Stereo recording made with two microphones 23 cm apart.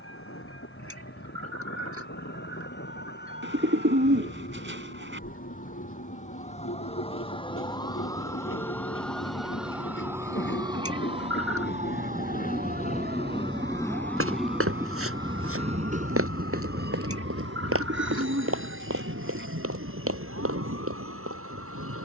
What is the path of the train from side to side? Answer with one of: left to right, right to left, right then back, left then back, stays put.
left to right.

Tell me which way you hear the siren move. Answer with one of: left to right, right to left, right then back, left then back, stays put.
left to right.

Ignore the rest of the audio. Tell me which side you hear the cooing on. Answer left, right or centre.
right.